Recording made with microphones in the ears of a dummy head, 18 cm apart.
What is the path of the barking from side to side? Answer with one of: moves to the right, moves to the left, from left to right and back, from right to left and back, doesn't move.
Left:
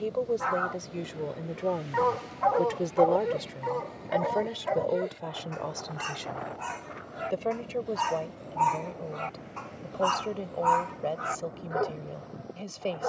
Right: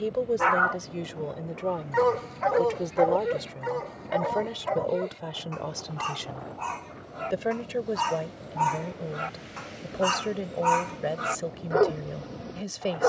from right to left and back.